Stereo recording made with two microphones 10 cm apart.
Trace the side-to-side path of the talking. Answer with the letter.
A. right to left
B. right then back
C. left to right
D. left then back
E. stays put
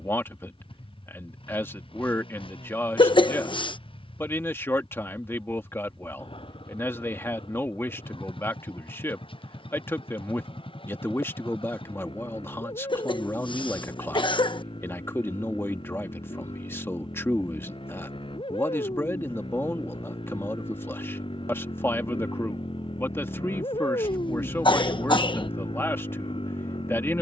E.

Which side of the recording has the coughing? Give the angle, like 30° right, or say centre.
60° left.